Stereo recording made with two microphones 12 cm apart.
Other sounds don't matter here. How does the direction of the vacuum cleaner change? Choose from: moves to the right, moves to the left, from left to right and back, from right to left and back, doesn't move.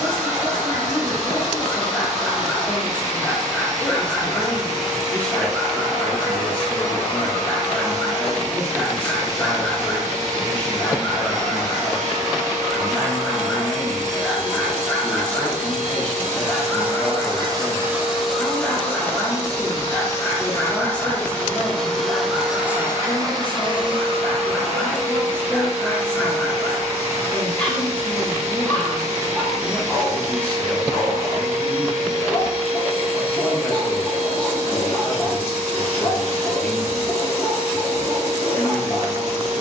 from right to left and back.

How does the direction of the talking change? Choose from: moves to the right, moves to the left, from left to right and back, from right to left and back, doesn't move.
doesn't move.